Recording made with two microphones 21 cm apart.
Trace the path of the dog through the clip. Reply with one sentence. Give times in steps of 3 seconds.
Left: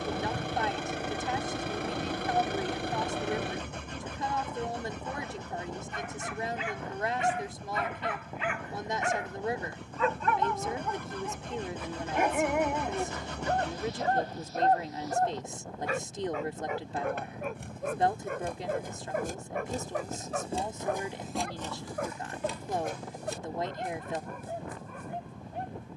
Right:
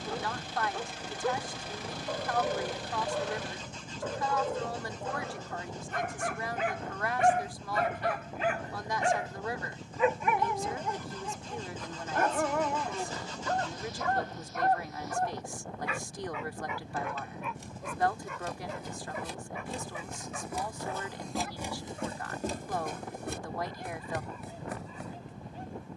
You can hear the dog on the right from 0 s, in the centre from 9 s and on the left from 12 s.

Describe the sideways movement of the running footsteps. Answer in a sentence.
You can hear the running footsteps move from left to right.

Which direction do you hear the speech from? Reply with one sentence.
In this clip you hear the speech on the left.